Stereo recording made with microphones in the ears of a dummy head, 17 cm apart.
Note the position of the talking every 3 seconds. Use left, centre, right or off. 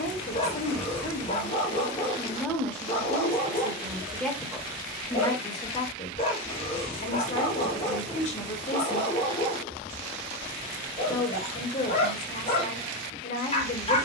left, centre, left, left, left.